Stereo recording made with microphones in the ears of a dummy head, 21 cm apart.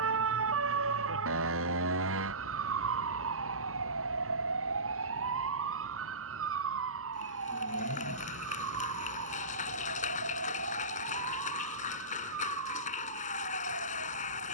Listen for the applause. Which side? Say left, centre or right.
left.